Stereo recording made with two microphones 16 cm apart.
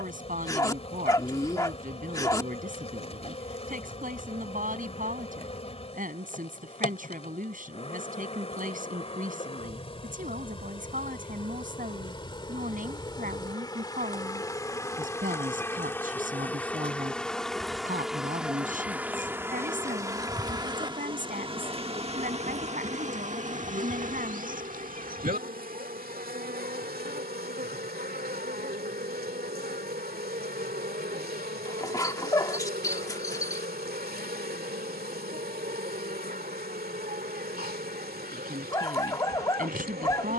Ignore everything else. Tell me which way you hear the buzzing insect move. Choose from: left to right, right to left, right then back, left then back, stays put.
left to right.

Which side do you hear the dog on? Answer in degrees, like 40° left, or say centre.
20° left.